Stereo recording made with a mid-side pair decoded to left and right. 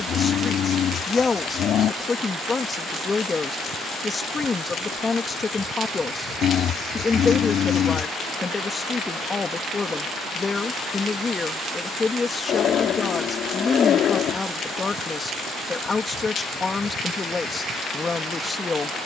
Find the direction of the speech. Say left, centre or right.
left.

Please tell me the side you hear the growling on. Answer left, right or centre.
left.